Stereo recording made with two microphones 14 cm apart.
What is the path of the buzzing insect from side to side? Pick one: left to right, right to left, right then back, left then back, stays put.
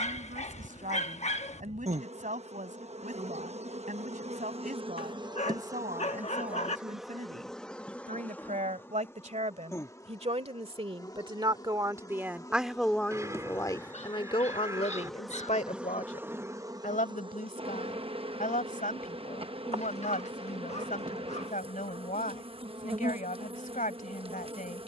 left then back.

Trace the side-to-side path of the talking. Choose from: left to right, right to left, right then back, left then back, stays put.
right to left.